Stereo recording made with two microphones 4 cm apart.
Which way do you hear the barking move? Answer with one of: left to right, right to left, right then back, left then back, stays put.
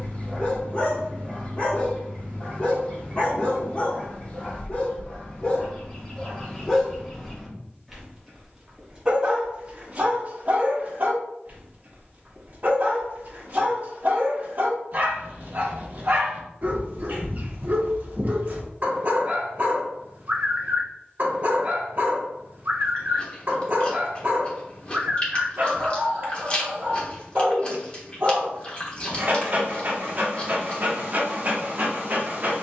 left to right.